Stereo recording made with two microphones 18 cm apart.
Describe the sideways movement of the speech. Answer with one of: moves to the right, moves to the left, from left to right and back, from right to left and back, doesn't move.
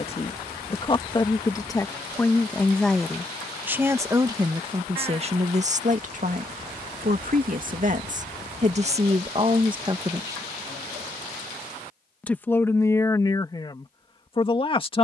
from left to right and back.